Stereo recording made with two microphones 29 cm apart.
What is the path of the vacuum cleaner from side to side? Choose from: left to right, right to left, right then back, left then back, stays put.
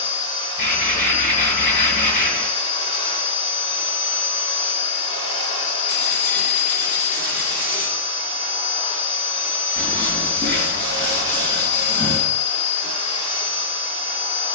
stays put.